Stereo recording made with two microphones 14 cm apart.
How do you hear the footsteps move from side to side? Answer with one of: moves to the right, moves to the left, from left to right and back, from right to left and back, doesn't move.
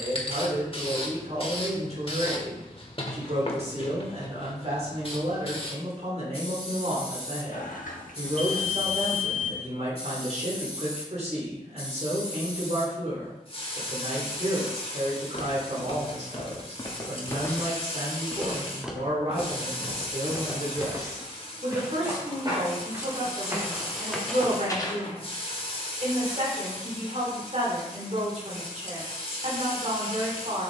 from left to right and back.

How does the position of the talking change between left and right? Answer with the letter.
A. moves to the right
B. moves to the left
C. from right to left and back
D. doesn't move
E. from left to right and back
D.